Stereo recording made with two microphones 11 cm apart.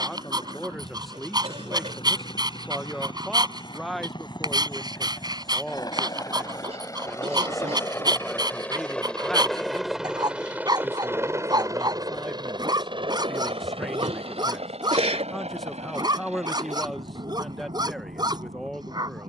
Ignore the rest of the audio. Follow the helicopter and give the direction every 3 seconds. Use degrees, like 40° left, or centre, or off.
50° left, 40° left, 20° left, 10° right, 50° right, 70° right, 80° right.